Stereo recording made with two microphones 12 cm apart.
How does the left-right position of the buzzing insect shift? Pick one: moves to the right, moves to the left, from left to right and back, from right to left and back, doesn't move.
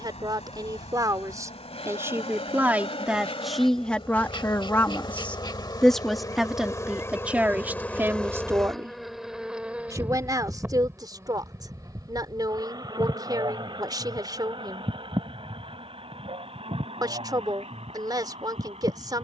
moves to the right.